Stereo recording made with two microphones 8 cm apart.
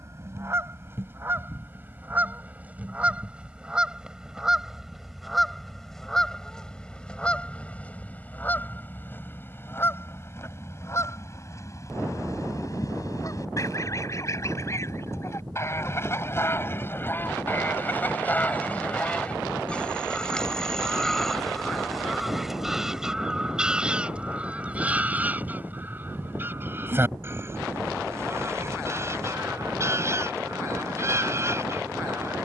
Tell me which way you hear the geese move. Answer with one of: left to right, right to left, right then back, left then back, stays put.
left then back.